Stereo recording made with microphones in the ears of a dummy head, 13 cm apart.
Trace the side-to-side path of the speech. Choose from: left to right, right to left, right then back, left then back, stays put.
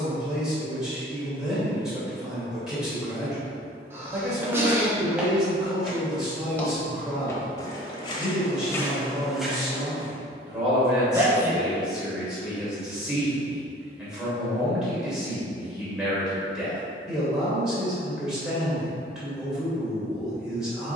stays put.